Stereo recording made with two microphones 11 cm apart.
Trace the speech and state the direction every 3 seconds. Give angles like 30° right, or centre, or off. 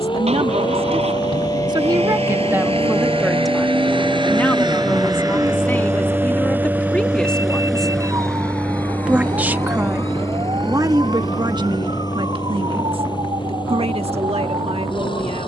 40° right, 10° left, 10° left, 30° right, 60° right.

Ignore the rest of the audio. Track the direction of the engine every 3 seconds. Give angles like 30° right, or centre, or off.
70° right, 40° right, centre, 30° left, 40° left.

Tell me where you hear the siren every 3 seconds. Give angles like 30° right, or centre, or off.
40° left, centre, 20° right, 40° right, 50° right.